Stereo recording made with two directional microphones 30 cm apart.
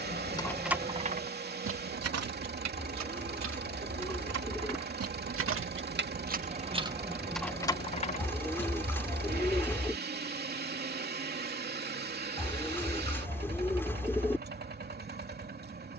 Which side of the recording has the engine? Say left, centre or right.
right.